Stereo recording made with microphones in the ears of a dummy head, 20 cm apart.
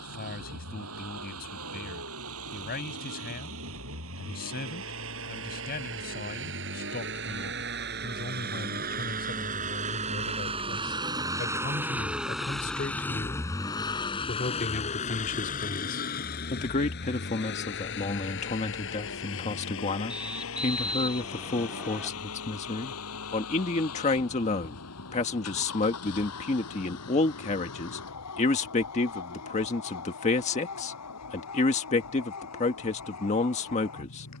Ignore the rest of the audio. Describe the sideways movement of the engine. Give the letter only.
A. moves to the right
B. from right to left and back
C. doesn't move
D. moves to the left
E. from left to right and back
D.